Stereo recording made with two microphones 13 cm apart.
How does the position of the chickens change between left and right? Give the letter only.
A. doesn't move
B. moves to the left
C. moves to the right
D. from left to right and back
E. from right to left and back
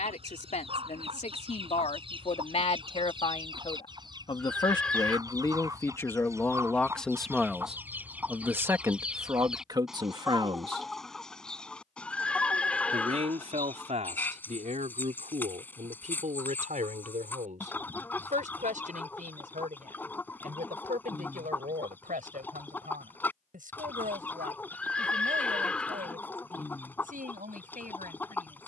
B.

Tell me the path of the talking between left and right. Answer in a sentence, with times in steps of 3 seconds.
You can hear the talking on the left from 0 s, in the centre from 6 s and on the right from 9 s.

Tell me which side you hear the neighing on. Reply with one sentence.
In this clip you hear the neighing in the centre.